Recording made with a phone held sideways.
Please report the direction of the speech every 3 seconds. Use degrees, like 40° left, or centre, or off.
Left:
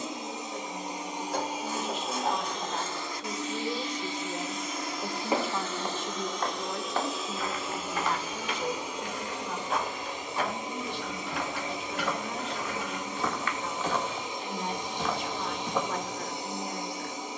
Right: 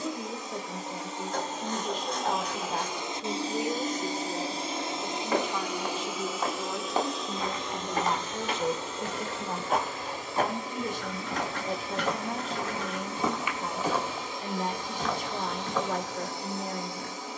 40° right, centre, 20° right, 40° right, 40° right, 40° right.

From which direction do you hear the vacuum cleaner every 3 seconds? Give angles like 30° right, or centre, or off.
10° left, 30° right, centre, 20° left, 20° left, 20° left.